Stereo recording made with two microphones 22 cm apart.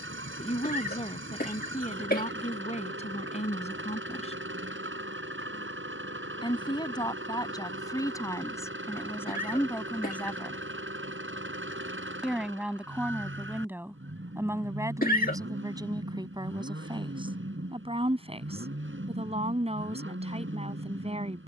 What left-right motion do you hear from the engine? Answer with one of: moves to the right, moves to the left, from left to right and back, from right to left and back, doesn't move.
doesn't move.